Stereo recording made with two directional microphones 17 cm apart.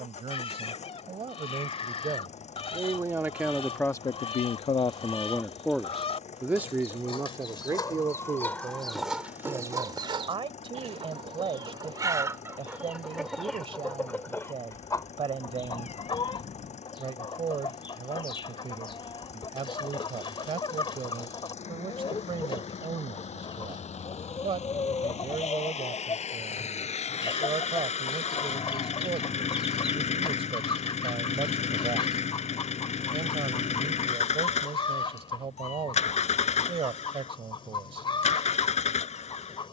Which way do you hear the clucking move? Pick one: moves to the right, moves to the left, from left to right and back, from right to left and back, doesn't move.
from left to right and back.